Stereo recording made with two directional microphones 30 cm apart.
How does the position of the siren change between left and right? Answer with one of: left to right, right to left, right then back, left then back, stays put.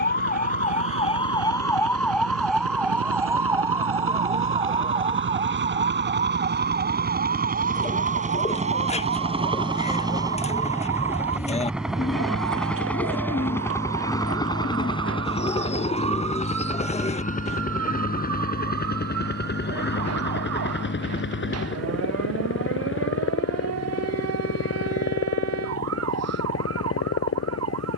left to right.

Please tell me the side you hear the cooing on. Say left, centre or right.
left.